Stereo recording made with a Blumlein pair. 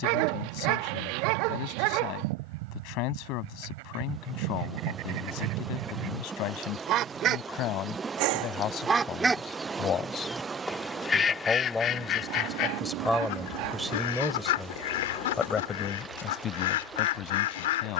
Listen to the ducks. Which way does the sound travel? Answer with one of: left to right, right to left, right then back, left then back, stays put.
right to left.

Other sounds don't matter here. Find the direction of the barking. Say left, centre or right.
right.